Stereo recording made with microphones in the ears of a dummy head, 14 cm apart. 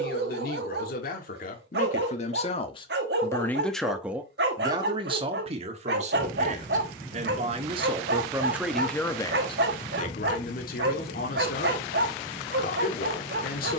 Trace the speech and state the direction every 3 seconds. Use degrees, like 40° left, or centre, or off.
60° left, 20° right, 30° right, 60° left, 70° left.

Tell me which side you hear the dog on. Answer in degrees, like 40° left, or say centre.
70° right.